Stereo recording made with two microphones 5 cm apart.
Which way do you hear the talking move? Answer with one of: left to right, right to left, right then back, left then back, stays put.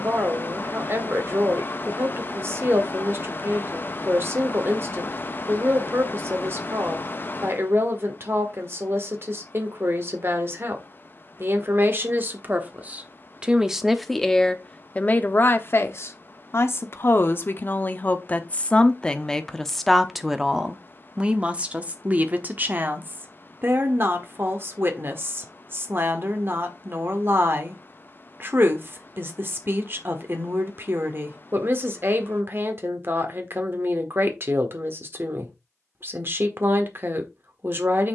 left then back.